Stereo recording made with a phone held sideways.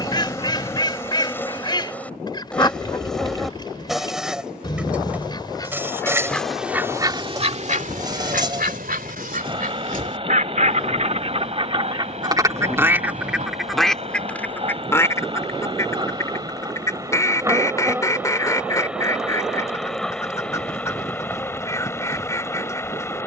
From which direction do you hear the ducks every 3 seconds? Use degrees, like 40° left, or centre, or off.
30° left, 30° left, 40° right, 50° right, centre, 20° left, 20° left, 20° left.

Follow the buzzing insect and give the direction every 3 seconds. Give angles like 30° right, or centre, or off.
10° left, 10° right, 20° right, 40° right, 40° right, 30° right, centre, 20° left.